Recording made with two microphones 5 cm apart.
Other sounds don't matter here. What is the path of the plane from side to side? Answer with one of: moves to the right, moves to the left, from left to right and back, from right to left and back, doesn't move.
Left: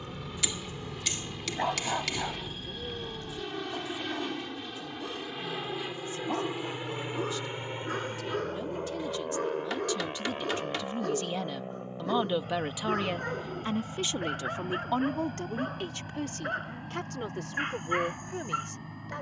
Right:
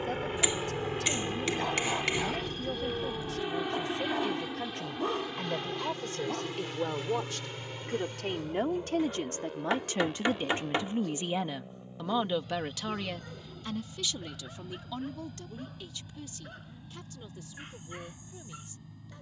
moves to the left.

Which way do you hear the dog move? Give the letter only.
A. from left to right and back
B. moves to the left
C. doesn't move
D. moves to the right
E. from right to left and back
A.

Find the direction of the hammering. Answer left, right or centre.
right.